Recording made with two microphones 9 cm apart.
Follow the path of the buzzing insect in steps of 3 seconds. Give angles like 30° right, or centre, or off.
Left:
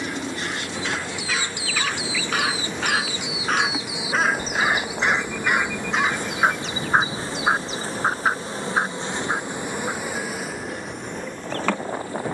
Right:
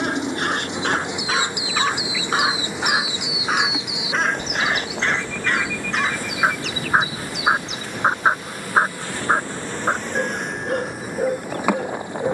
20° right, 10° left, 30° left, centre.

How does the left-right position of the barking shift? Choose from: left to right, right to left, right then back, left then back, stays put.
left then back.